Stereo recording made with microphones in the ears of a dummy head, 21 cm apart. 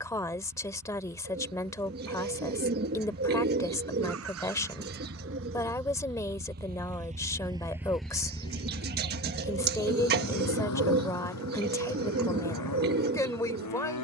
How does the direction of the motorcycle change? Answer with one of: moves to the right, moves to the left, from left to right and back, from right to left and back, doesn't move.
moves to the left.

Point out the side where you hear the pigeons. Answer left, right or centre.
right.